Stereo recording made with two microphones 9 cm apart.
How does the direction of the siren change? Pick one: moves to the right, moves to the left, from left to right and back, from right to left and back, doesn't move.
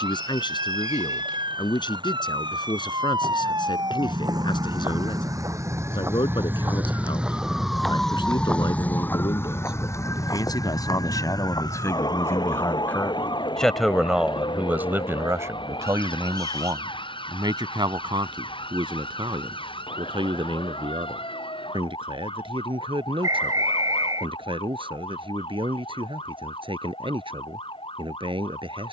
moves to the left.